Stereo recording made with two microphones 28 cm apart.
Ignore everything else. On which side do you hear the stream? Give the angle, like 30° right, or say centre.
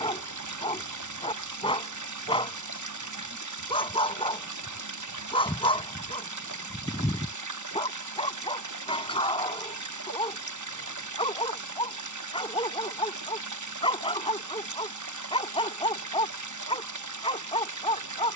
80° right.